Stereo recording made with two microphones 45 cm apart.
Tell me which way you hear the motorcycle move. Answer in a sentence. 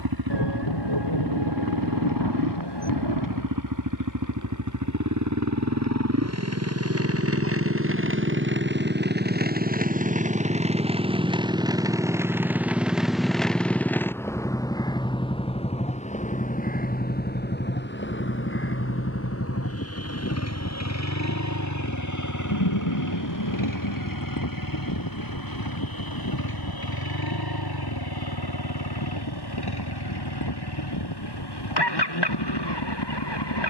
You can hear the motorcycle move from right to left.